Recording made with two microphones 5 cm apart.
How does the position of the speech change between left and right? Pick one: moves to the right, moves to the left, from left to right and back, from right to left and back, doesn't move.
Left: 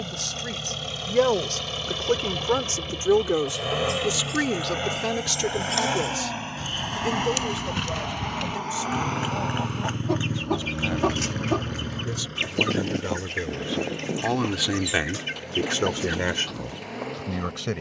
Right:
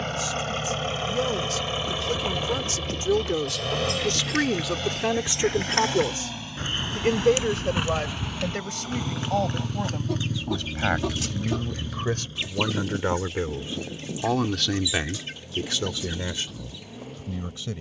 from left to right and back.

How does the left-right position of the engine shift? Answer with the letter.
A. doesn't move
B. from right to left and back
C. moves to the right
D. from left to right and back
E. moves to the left
E.